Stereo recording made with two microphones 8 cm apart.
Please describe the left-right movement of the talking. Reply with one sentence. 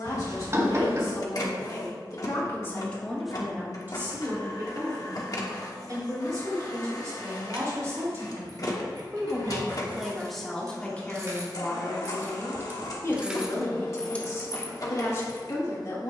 You can hear the talking go right and come back.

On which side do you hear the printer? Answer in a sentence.
In this clip you hear the printer on the left.